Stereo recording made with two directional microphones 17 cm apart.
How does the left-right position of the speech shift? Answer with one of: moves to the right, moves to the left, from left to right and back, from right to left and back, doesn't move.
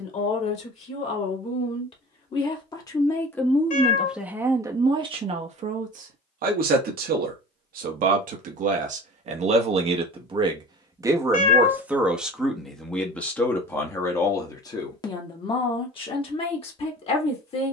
from left to right and back.